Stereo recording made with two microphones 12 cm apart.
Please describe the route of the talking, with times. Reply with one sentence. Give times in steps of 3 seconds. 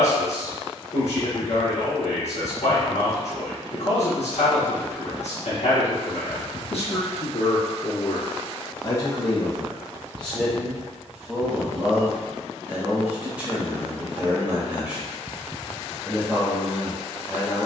In this clip you hear the talking on the left from 0 s and in the centre from 9 s.